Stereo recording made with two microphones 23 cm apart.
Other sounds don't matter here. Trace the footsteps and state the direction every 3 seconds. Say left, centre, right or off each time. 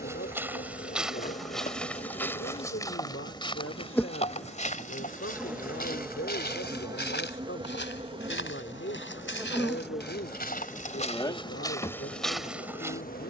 centre, left, left, left, centre.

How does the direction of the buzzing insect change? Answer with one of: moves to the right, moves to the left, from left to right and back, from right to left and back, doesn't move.
from left to right and back.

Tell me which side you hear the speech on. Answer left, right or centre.
left.